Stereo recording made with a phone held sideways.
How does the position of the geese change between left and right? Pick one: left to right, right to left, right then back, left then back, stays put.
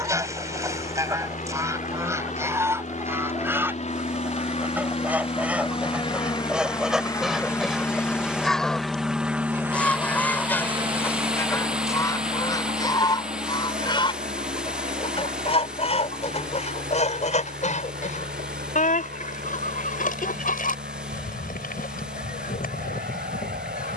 right to left.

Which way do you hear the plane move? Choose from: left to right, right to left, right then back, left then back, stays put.
left to right.